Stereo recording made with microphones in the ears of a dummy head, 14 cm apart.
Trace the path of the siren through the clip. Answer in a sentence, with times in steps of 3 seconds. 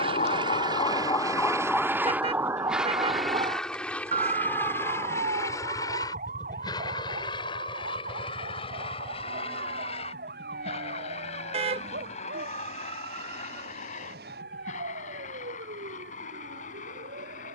In this clip you hear the siren in the centre from 0 s and on the right from 3 s.